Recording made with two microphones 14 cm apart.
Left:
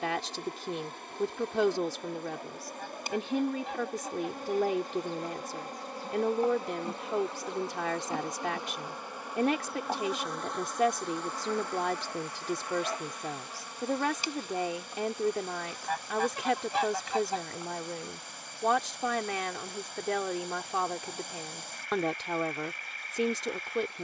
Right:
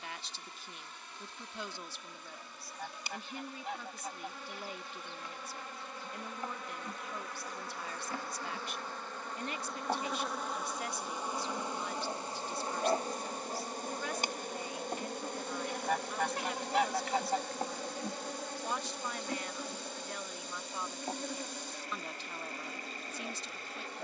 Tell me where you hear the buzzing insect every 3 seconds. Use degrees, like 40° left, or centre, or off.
50° left, 40° left, 20° left, centre, 40° right, 60° right, 70° right, 80° right.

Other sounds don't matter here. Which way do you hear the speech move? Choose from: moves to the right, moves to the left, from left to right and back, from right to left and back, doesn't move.
doesn't move.